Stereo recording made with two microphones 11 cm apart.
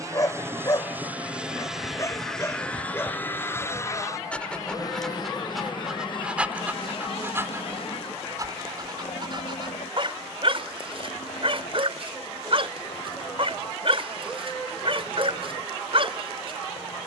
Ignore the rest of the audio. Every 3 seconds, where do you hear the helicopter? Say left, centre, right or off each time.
centre, left, left, left, left, left.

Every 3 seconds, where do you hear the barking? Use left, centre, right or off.
left, centre, right, right, right, right.